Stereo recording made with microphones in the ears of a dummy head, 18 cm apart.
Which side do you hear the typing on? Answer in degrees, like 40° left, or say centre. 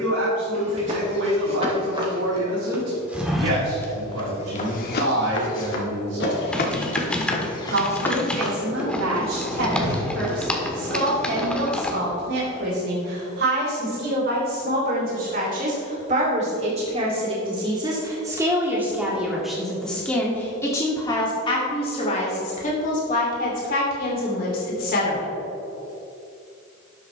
10° left.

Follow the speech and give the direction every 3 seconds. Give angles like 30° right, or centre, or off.
60° right, 60° right, 60° right, 60° right, 50° right, 30° right, centre, 30° left, 50° left.